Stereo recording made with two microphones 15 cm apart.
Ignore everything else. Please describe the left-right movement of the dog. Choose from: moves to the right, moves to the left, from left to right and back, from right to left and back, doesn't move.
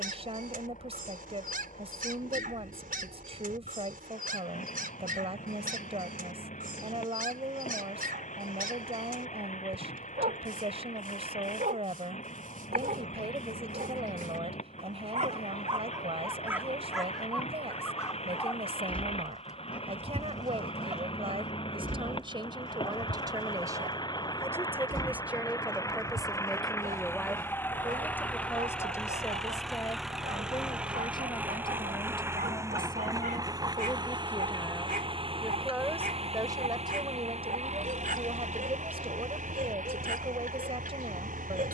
from right to left and back.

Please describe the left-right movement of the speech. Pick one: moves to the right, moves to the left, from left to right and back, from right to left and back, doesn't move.
from right to left and back.